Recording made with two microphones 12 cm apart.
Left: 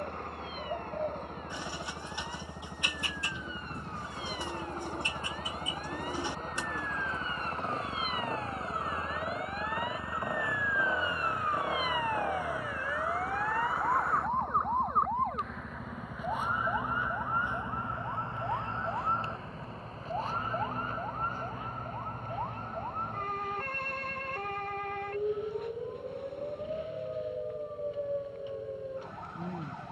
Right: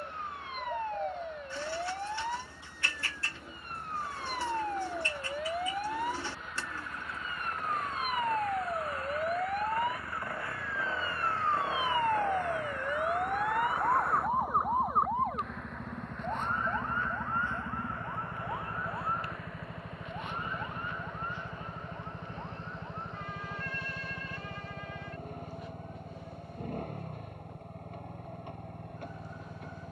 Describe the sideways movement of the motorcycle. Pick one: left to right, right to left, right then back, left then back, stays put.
left to right.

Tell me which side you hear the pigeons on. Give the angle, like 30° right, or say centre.
20° left.